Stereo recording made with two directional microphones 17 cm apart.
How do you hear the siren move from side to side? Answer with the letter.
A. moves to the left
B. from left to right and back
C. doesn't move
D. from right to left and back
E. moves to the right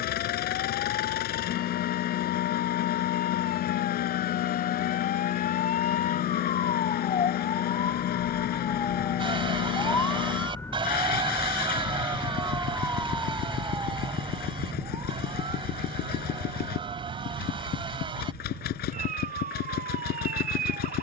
E.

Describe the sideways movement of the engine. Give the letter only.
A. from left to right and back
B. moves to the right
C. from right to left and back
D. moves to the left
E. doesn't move
E.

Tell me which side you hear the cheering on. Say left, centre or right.
right.